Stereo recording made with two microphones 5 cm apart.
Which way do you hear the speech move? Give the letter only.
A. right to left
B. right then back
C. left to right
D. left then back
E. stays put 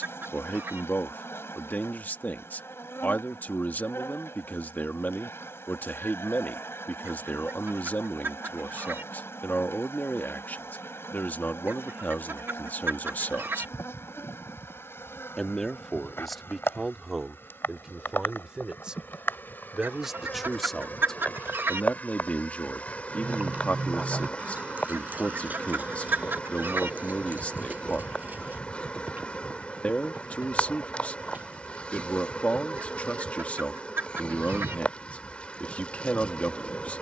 B.